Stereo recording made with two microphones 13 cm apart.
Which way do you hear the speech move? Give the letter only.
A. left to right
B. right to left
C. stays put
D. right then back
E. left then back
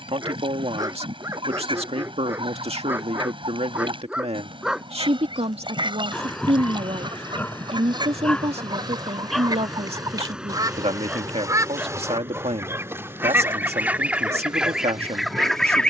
C.